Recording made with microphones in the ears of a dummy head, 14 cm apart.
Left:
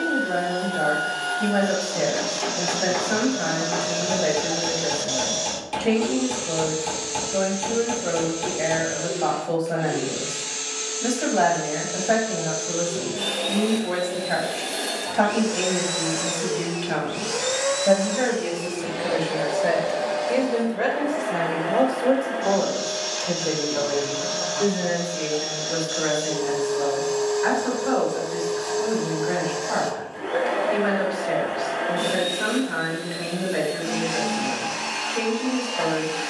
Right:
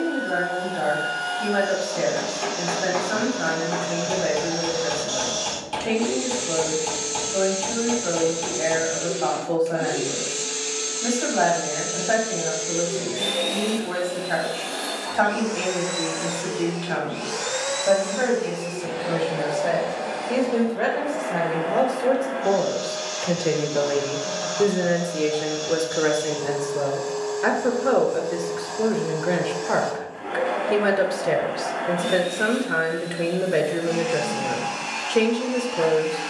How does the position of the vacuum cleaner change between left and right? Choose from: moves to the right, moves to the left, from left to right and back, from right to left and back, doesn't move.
from left to right and back.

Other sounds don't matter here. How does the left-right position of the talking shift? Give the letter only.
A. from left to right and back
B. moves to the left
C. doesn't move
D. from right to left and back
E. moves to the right
E.